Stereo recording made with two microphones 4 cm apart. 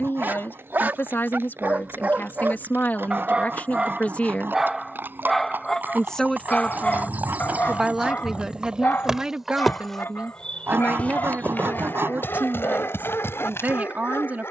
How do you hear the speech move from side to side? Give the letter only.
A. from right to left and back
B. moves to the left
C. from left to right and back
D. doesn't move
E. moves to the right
E.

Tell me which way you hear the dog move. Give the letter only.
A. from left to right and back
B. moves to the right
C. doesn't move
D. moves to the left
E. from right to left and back
D.